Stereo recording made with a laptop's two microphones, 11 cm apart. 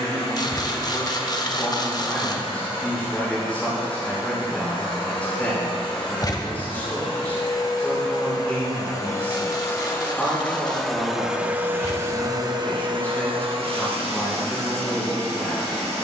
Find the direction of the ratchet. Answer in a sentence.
You can hear the ratchet on the left.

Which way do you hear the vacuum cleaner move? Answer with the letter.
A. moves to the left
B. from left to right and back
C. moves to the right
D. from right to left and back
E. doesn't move
C.